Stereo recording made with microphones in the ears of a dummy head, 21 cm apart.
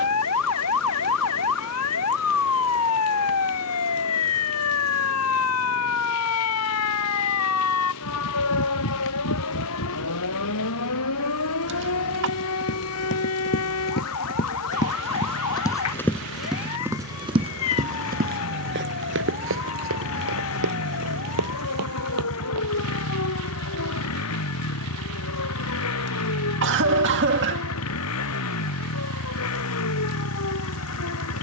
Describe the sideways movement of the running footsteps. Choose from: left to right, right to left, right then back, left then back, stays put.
left to right.